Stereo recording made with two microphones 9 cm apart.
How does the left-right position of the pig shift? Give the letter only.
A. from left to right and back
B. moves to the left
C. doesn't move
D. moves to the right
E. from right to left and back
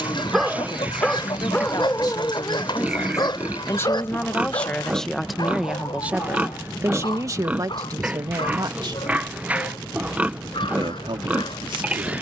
C.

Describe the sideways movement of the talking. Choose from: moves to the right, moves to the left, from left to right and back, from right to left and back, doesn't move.
moves to the right.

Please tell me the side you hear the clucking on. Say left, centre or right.
left.